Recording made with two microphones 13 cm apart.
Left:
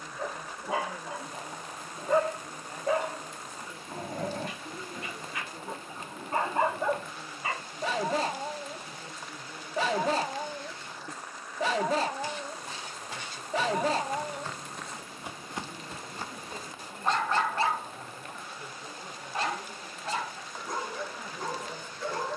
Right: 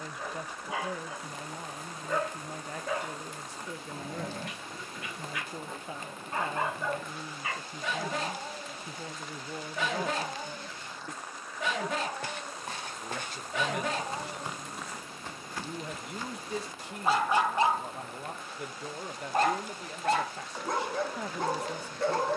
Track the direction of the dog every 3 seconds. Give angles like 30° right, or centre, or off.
30° left, 30° left, 30° left, 30° left, 30° left, 10° right, 50° right, 60° right.